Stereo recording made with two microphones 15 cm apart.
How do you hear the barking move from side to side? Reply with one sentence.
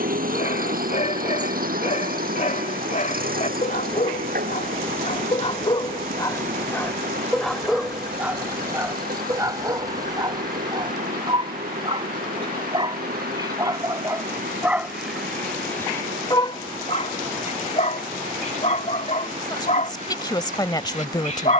You can hear the barking move from left to right and back again.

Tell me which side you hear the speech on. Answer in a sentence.
In this clip you hear the speech on the left.